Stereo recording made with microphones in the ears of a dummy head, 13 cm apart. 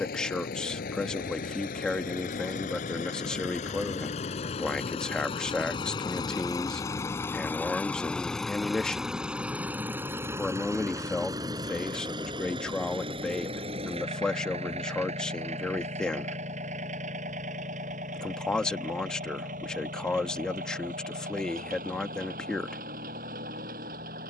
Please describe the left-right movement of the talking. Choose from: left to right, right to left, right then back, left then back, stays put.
stays put.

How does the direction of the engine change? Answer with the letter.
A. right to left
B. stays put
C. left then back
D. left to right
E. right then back
D.